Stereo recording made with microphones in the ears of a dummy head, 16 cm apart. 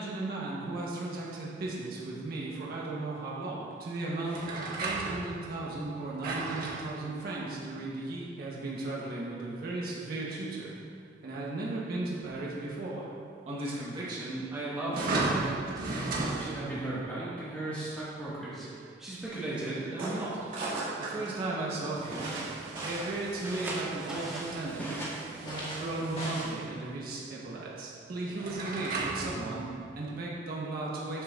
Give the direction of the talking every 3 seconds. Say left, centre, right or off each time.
right, right, right, right, right, centre, centre, right, right, right, right.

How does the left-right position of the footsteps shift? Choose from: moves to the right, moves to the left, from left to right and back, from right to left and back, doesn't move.
moves to the left.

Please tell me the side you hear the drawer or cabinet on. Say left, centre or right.
right.